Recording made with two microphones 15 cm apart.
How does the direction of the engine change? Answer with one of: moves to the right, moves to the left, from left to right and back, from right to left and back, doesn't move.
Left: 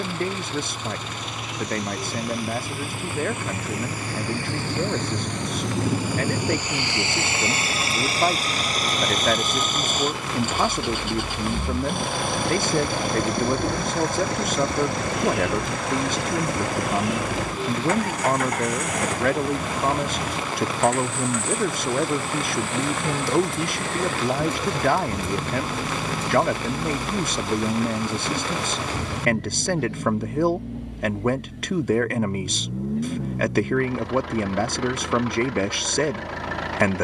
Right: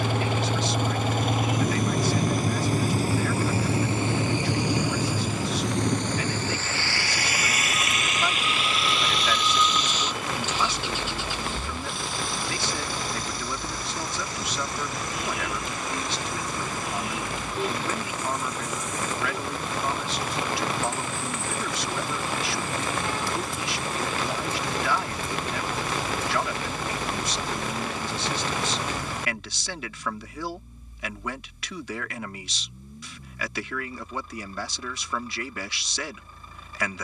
moves to the left.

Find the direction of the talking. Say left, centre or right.
left.